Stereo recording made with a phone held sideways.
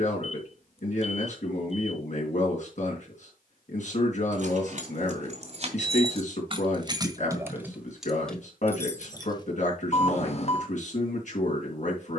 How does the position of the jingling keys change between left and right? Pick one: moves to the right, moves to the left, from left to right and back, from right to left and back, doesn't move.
moves to the left.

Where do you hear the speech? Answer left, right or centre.
left.